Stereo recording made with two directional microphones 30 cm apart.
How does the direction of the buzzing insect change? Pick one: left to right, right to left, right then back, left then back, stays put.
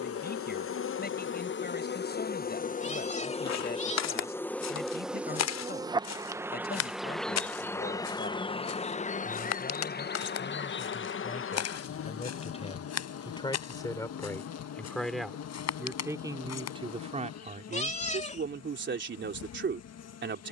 right then back.